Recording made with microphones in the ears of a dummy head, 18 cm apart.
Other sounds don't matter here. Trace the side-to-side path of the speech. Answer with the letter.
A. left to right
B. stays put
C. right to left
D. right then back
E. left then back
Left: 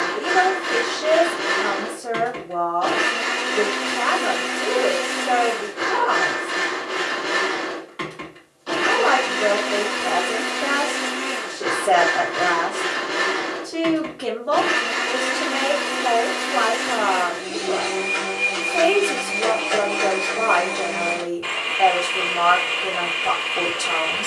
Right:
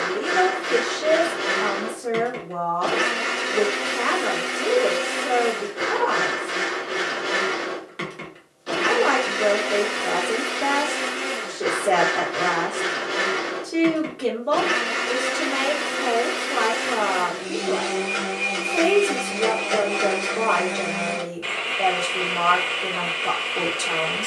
B.